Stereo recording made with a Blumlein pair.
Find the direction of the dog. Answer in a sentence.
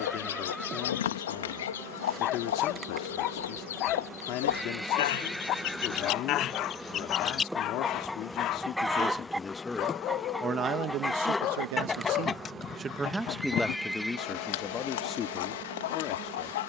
You can hear the dog on the left.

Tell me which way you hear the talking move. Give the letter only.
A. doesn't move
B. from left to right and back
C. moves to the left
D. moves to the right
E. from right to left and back
B.